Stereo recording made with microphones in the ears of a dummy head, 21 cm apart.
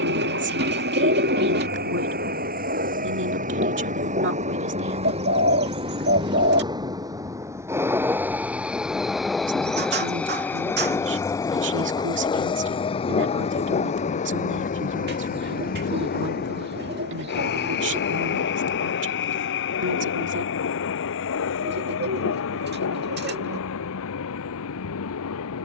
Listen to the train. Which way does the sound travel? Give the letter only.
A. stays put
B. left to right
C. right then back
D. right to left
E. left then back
D.